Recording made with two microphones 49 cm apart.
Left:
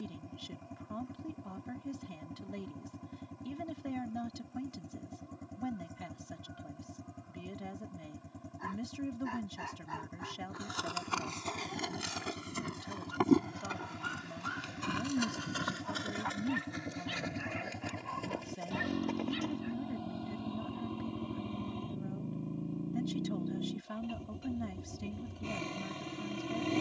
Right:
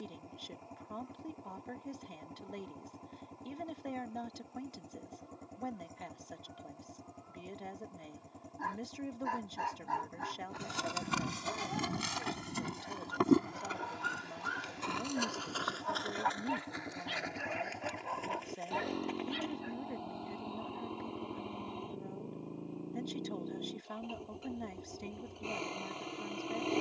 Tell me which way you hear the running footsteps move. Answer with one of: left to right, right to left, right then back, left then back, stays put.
right to left.